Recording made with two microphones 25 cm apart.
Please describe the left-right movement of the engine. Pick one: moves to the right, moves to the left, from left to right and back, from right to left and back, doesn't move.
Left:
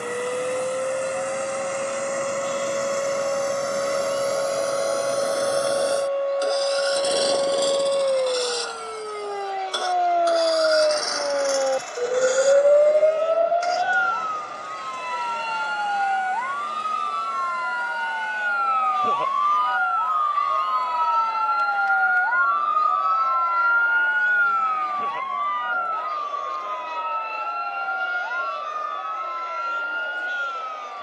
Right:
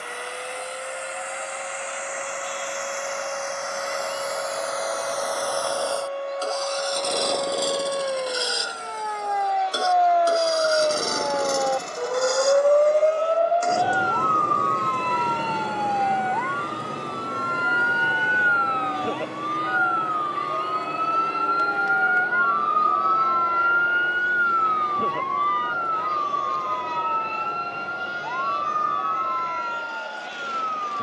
moves to the right.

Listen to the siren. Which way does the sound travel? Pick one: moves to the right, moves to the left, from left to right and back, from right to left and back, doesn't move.
moves to the right.